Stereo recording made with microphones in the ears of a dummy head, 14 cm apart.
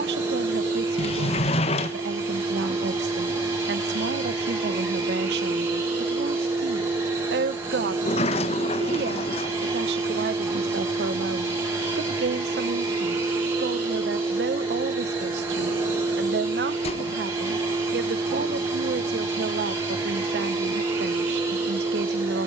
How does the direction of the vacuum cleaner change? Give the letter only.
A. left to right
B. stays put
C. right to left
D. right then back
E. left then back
B.